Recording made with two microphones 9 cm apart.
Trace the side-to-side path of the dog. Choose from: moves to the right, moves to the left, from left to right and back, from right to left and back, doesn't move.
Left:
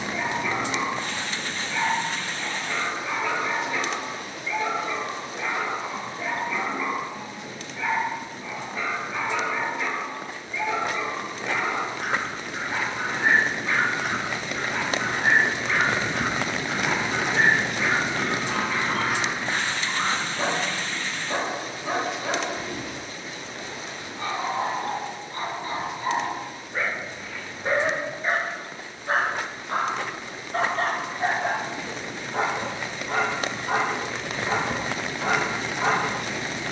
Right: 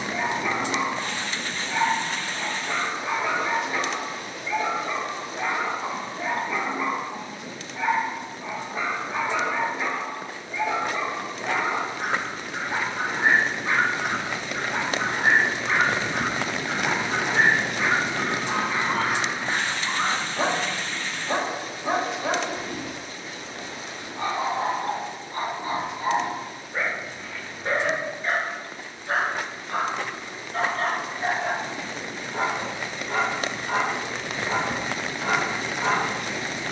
moves to the left.